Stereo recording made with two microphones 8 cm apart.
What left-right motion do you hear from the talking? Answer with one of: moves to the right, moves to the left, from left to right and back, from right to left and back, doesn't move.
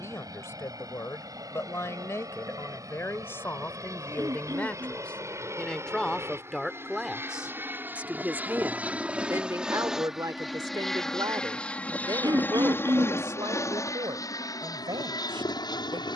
moves to the right.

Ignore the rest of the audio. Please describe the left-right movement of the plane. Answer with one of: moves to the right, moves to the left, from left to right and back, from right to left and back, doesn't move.
moves to the left.